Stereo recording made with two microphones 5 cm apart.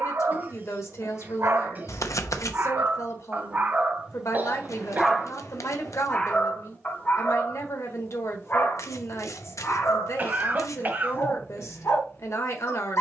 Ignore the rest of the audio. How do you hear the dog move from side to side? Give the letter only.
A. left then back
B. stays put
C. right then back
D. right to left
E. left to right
D.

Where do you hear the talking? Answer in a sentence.
You can hear the talking on the left.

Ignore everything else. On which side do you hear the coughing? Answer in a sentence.
In this clip you hear the coughing on the right.